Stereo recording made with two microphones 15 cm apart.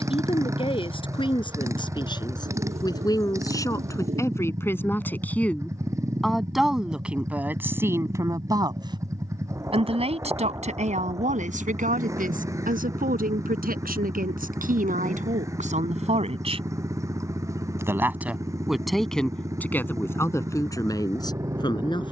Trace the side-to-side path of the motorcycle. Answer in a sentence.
You can hear the motorcycle stay in one place.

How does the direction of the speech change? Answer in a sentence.
You can hear the speech move from left to right and back again.